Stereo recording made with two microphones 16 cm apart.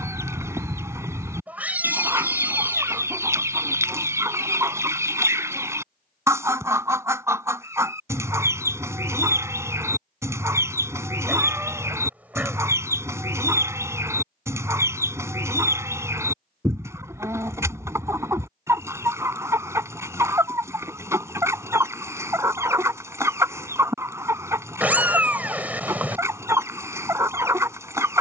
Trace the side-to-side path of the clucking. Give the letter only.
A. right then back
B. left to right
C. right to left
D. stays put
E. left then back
D.